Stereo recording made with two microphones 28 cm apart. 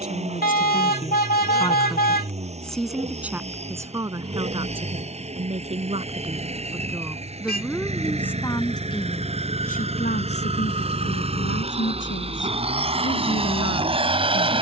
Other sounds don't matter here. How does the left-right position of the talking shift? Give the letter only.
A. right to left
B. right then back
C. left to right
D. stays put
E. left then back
B.